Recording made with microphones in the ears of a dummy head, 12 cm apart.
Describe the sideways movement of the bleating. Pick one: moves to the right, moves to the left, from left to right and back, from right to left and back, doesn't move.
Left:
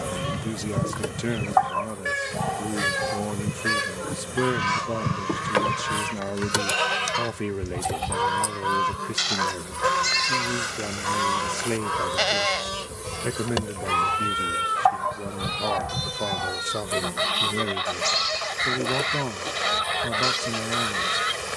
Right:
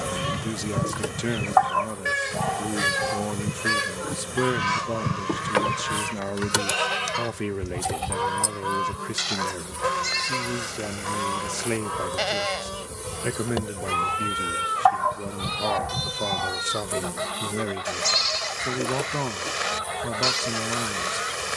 from right to left and back.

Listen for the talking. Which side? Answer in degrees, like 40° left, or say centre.
10° right.